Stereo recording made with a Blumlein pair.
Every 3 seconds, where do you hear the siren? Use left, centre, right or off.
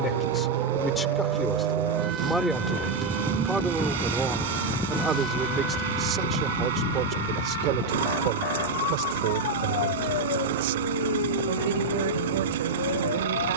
right, centre, left, left, left.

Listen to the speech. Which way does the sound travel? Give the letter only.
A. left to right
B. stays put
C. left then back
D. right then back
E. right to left
A.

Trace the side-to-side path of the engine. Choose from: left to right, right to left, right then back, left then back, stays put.
stays put.